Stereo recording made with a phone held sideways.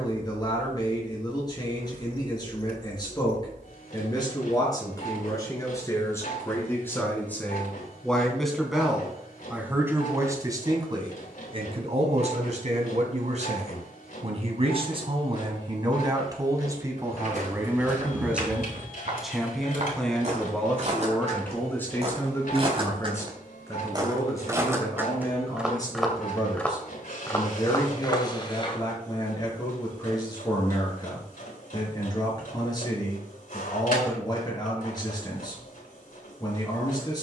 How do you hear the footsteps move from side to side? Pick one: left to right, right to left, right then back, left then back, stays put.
right to left.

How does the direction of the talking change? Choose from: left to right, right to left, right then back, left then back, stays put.
right then back.